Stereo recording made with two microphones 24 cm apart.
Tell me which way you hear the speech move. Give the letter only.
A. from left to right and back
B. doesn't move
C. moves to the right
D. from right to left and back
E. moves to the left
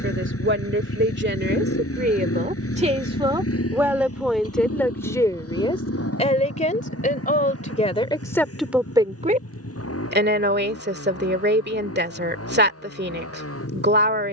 D.